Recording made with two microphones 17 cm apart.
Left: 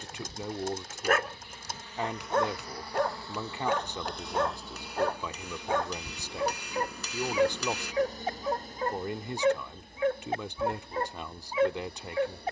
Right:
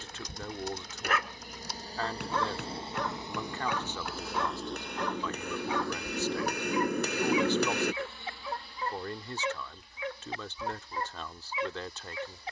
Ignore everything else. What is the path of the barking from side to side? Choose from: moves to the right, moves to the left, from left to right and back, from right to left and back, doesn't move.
doesn't move.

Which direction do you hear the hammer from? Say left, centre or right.
right.